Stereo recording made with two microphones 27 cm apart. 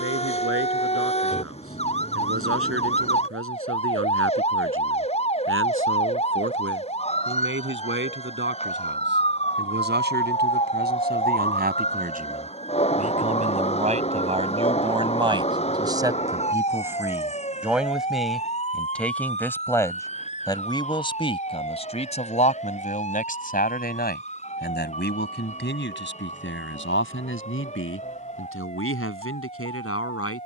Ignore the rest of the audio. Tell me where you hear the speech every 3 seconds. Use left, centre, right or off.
right, right, right, right, right, centre, centre, left, left, left.